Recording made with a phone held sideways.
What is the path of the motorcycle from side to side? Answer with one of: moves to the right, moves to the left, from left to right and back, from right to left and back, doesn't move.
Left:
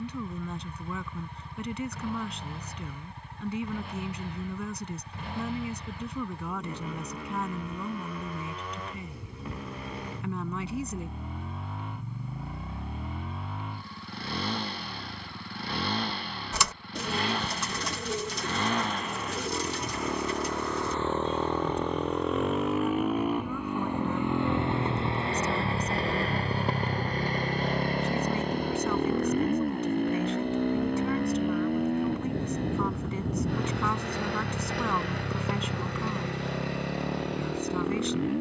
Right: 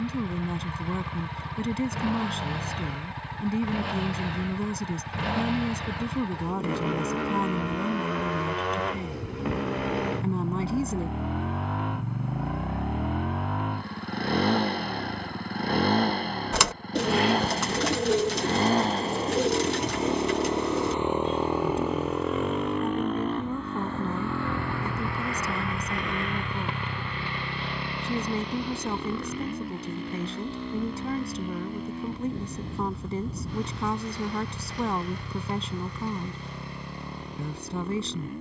moves to the left.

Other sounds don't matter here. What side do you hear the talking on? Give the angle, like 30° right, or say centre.
30° right.